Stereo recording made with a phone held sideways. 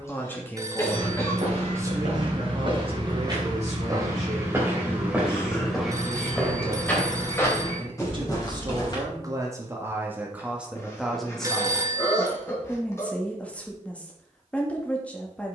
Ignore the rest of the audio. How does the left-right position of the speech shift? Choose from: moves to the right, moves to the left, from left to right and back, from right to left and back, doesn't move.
from left to right and back.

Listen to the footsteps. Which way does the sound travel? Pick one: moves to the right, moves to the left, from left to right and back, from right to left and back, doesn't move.
moves to the left.